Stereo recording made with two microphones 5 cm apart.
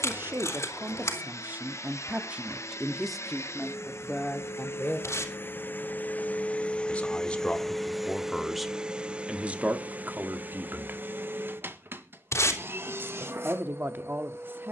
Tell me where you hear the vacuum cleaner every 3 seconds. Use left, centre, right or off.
left, left, centre, right, right.